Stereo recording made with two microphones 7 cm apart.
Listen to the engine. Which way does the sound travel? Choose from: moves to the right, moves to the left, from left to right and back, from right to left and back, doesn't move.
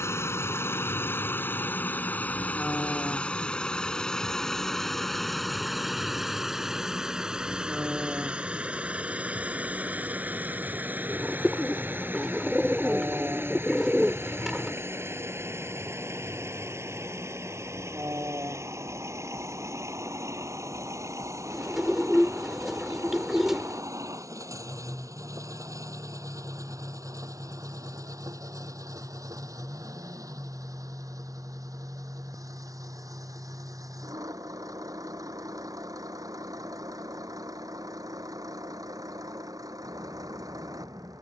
moves to the right.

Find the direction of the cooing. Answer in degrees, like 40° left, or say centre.
10° right.